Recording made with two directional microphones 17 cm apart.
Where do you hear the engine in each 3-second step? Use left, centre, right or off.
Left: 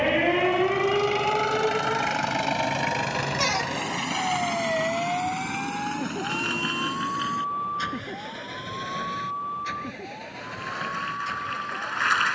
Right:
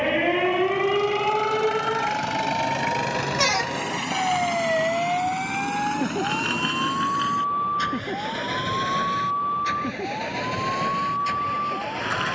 centre, right, right, right.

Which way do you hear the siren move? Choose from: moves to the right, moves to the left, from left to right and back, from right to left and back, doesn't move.
moves to the right.